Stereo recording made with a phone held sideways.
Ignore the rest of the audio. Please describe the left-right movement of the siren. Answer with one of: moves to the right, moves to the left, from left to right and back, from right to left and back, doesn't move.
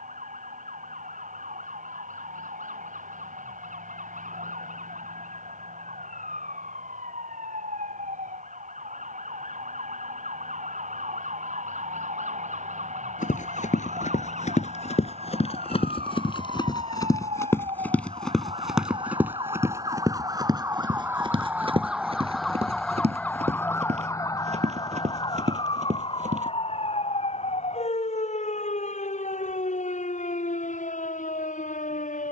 moves to the left.